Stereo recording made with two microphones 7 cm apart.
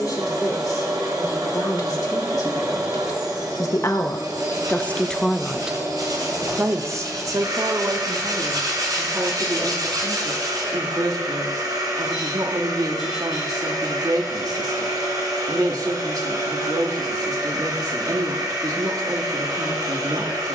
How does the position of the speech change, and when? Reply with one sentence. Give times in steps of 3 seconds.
You can hear the speech on the left from 0 s and on the right from 6 s.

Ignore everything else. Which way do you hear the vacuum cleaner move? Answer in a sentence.
You can hear the vacuum cleaner stay in one place.